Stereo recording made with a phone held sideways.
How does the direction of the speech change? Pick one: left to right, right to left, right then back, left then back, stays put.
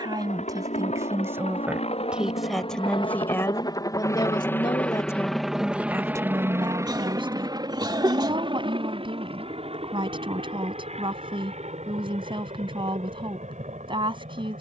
left then back.